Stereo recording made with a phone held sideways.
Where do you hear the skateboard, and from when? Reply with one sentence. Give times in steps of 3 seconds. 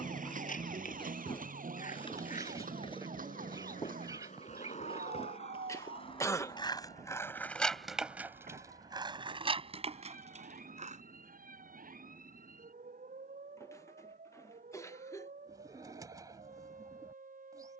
You can hear the skateboard on the left from 0 s, in the centre from 6 s, on the right from 9 s and not at all from 12 s.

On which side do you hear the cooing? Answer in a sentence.
In this clip you hear the cooing on the right.